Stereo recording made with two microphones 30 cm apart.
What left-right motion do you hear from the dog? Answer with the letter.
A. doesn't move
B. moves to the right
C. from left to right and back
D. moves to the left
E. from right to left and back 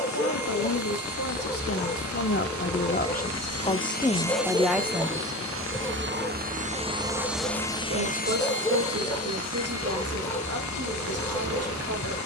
A.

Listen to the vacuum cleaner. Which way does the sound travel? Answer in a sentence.
You can hear the vacuum cleaner move from left to right and back again.